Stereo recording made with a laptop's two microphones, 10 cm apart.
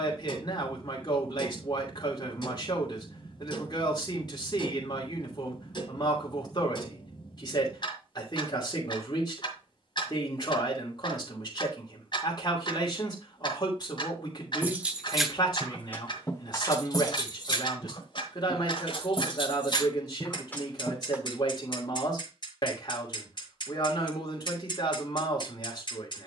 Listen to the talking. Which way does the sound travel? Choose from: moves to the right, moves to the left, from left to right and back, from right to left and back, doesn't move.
doesn't move.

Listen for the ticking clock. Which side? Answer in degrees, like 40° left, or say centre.
50° left.